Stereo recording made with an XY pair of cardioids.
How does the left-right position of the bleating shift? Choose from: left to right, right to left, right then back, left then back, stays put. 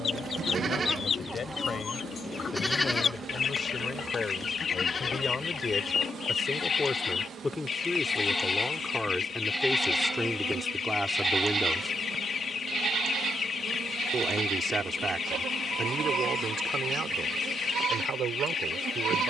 left then back.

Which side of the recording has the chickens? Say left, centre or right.
left.